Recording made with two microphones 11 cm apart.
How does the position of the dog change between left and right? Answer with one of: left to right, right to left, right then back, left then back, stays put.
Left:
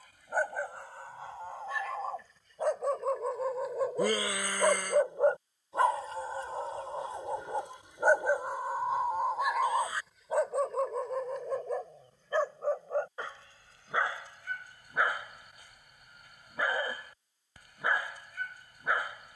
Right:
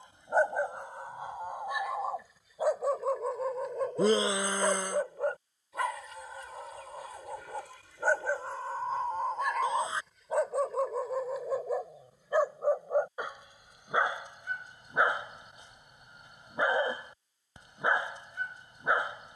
left then back.